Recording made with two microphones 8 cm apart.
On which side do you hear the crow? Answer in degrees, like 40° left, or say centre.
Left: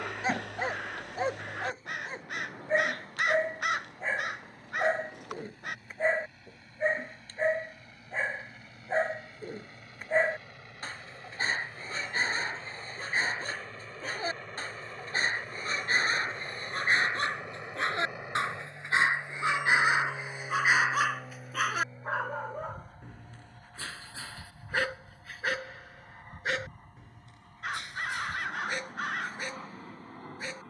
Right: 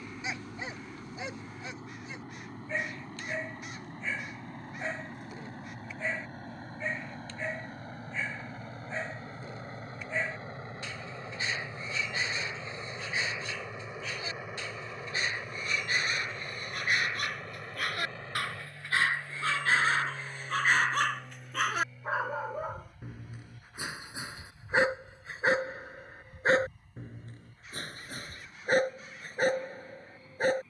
80° left.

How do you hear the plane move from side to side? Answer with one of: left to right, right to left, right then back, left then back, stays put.
right to left.